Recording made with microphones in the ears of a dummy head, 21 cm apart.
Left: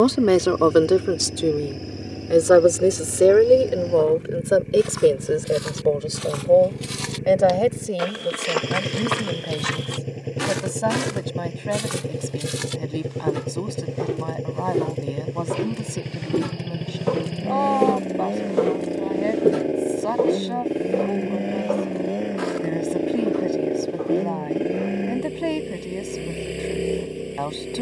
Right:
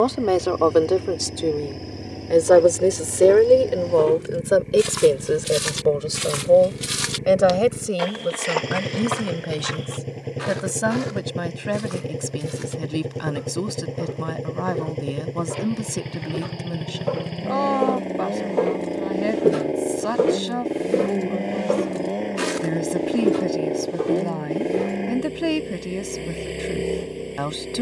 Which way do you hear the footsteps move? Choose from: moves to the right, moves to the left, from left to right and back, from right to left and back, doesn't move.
from right to left and back.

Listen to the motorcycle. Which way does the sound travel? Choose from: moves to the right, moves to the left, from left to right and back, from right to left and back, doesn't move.
doesn't move.